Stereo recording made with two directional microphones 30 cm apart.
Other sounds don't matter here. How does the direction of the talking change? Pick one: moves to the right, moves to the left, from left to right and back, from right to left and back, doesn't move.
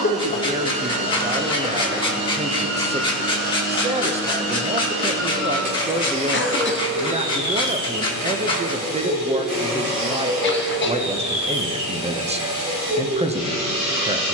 doesn't move.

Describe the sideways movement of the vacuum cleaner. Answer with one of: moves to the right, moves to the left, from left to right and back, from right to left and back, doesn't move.
doesn't move.